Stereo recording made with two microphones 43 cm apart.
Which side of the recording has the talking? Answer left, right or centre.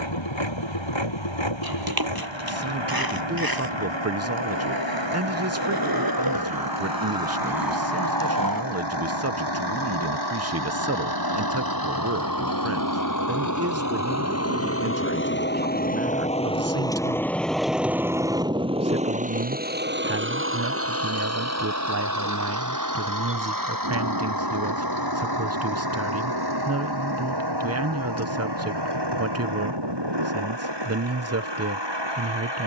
right.